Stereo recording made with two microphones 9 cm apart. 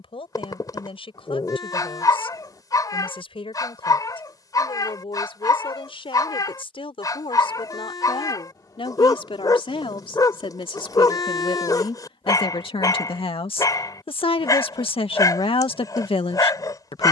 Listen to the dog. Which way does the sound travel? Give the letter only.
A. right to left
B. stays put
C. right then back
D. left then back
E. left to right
B.